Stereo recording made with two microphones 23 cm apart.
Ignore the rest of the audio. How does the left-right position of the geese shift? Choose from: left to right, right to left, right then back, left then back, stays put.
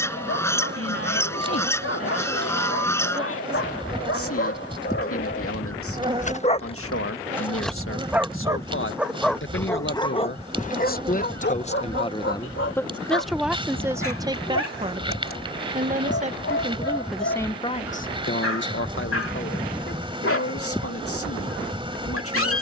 stays put.